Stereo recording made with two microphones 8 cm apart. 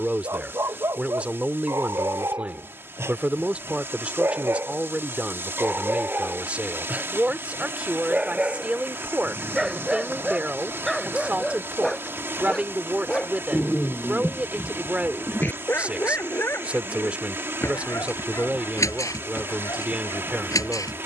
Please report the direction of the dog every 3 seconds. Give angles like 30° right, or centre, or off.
30° right, 30° right, 20° right, centre, 10° left, 30° left, 40° left.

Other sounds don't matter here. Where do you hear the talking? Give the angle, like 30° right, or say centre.
20° right.